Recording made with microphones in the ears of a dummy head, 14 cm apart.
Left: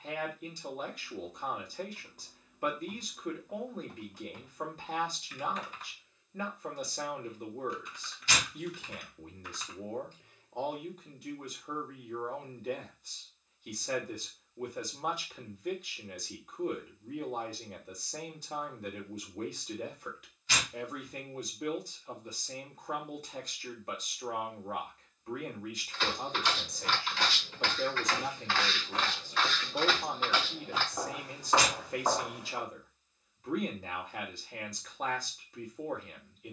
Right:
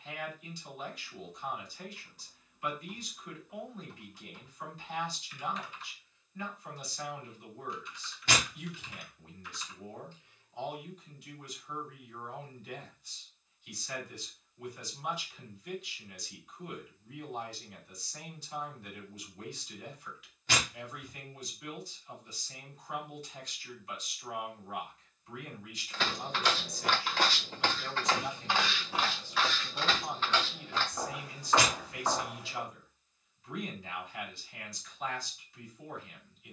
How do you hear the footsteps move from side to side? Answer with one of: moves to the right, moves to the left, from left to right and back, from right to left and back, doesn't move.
moves to the left.